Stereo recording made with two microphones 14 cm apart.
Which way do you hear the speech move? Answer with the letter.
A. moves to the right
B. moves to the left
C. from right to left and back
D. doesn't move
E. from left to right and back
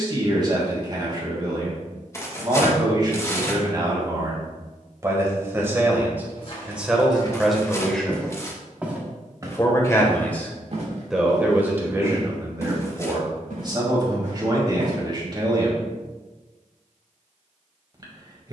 C.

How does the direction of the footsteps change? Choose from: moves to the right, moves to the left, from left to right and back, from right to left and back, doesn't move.
moves to the right.